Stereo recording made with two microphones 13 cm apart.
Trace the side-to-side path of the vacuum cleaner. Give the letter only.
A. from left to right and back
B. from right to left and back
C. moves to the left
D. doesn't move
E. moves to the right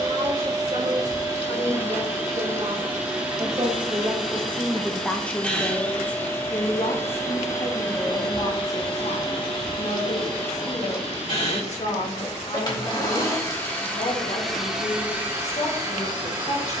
B.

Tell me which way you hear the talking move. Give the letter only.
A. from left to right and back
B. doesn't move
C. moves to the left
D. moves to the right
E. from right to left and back
C.